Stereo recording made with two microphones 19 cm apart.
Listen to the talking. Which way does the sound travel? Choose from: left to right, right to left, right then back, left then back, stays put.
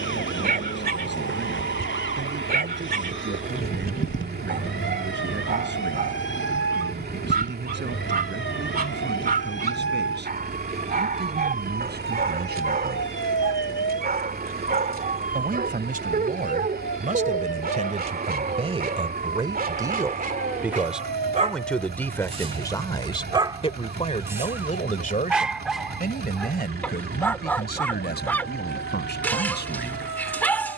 right to left.